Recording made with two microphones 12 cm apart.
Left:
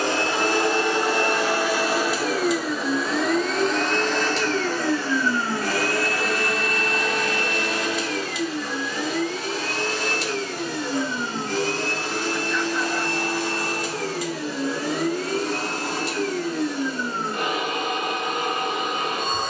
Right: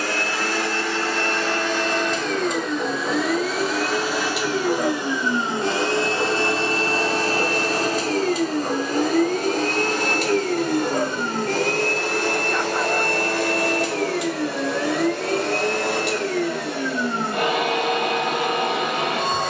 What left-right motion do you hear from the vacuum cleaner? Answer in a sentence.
You can hear the vacuum cleaner travel towards the right.